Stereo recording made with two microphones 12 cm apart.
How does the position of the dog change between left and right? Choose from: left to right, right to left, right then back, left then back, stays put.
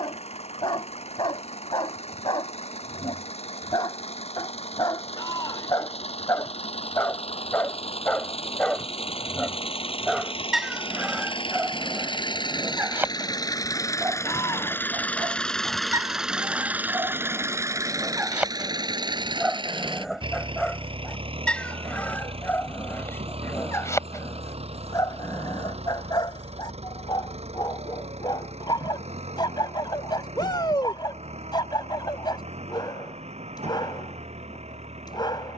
right then back.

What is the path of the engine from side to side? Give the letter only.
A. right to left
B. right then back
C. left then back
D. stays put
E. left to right
E.